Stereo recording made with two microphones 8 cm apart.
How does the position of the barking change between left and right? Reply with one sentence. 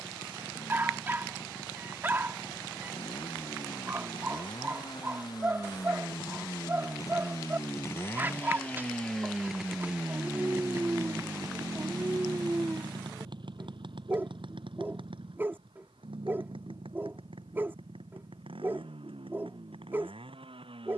You can hear the barking stay put.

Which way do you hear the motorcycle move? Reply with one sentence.
You can hear the motorcycle travel towards the right.